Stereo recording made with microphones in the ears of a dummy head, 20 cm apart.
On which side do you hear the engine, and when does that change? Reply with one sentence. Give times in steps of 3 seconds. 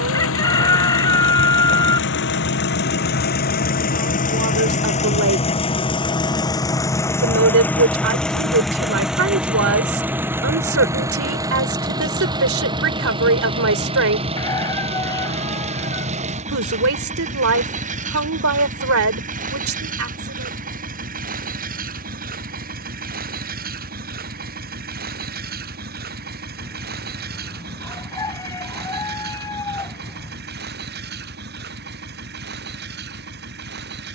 In this clip you hear the engine on the left from 0 s, in the centre from 6 s and on the right from 12 s.